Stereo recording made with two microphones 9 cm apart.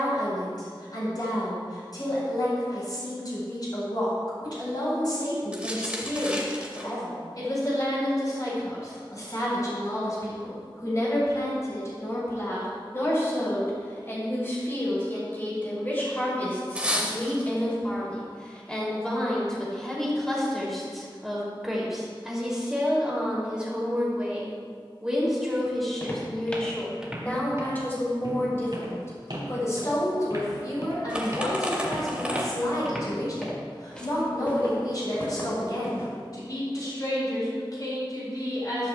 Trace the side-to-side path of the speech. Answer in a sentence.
You can hear the speech move from left to right and back again.